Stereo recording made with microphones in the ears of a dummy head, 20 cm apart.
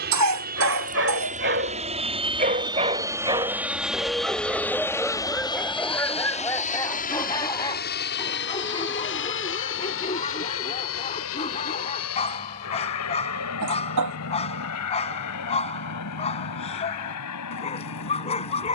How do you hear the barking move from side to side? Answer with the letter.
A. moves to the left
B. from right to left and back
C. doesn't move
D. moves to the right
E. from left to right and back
A.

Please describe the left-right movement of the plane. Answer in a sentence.
In this clip you hear the plane move from right to left.